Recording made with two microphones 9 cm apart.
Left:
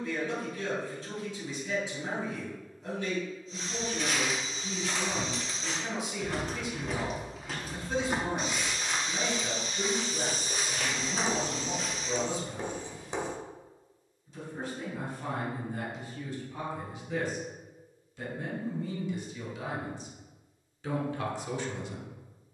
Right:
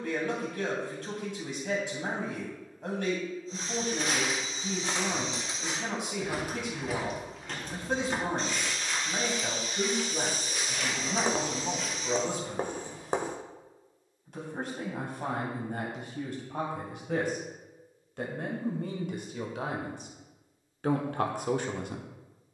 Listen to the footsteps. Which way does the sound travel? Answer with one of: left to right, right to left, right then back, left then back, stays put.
right to left.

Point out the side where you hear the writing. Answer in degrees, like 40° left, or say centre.
50° right.